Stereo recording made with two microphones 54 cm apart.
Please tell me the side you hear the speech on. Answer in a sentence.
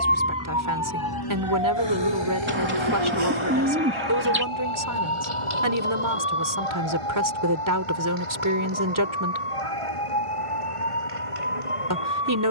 In this clip you hear the speech on the right.